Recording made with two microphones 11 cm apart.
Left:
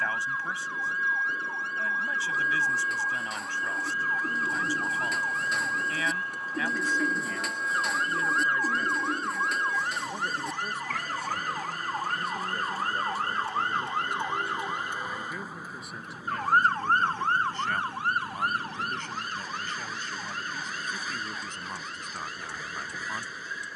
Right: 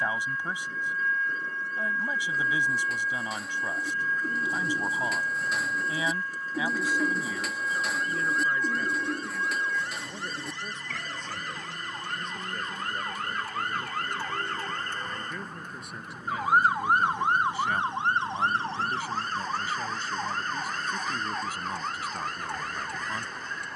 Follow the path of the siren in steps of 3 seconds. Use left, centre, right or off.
left, left, left, left, left, centre, right, right.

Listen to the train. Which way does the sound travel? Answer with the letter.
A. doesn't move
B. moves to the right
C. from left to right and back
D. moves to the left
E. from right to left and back
A.